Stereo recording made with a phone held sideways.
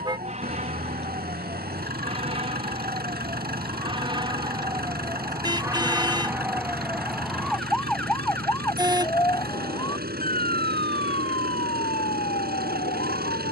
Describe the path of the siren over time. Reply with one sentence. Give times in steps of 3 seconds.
In this clip you hear the siren on the right from 0 s, in the centre from 6 s and on the left from 9 s.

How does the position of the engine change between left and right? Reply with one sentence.
You can hear the engine stay put.